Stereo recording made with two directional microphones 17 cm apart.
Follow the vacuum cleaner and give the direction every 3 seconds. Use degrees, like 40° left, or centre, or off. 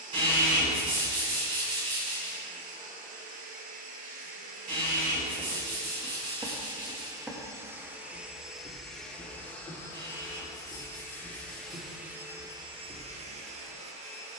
50° right, 50° right, 20° right, 10° left, 30° right.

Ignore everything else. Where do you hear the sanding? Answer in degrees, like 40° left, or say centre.
30° right.